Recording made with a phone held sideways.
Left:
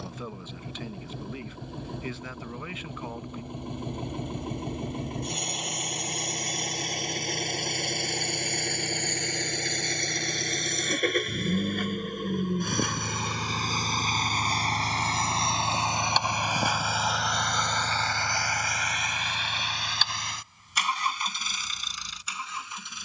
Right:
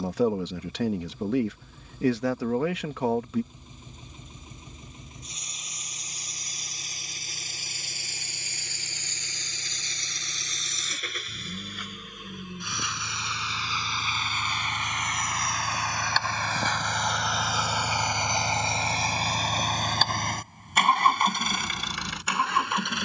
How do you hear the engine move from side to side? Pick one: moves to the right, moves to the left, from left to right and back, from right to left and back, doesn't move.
moves to the right.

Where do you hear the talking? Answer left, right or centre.
right.